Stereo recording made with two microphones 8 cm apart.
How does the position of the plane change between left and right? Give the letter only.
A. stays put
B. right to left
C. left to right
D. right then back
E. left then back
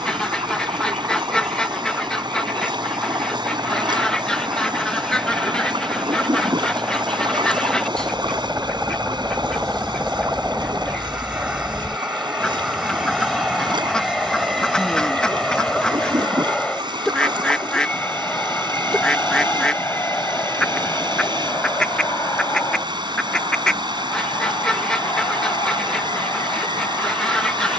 B.